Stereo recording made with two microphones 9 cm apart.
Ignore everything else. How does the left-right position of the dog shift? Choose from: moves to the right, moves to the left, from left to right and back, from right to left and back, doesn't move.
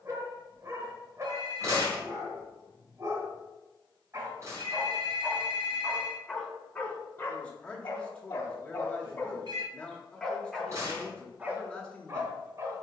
from right to left and back.